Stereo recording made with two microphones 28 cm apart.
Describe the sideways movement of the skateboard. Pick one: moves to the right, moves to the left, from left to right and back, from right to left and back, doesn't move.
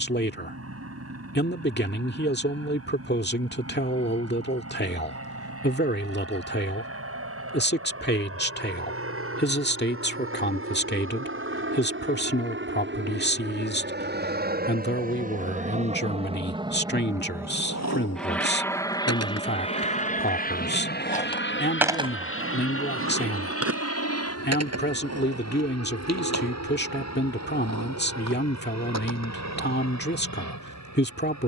moves to the right.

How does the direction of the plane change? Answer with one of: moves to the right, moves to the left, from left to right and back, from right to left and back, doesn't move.
moves to the left.